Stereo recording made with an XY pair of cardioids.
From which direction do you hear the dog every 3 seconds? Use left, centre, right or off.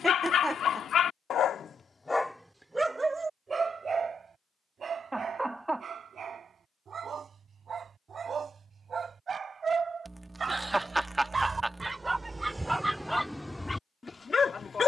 left, right, right, right, centre.